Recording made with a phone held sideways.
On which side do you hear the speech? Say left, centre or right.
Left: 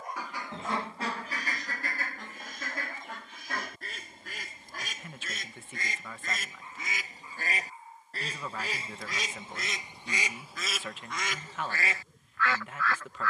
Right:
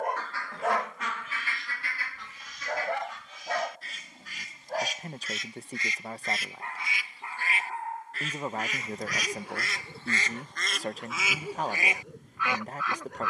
right.